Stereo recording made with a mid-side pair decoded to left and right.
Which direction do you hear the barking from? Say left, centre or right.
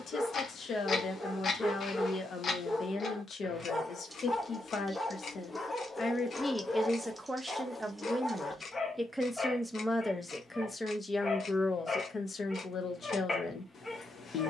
left.